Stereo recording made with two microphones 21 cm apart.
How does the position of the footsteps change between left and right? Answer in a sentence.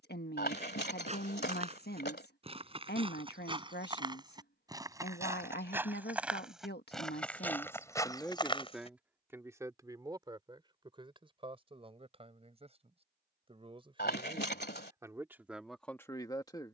In this clip you hear the footsteps go from the right side to the left.